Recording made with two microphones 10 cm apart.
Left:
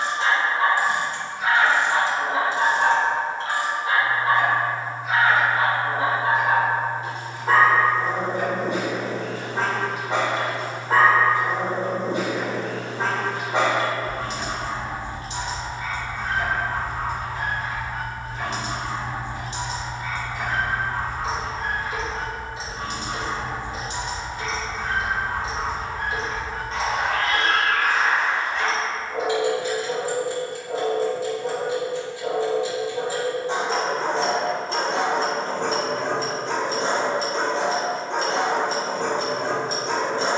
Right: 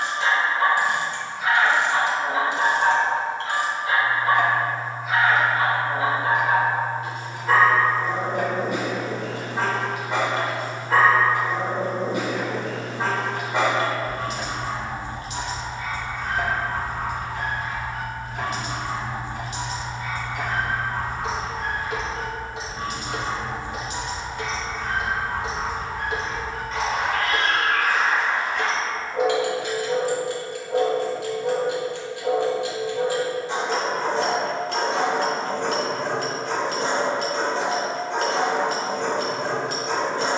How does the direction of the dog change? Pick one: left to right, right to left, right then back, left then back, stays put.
stays put.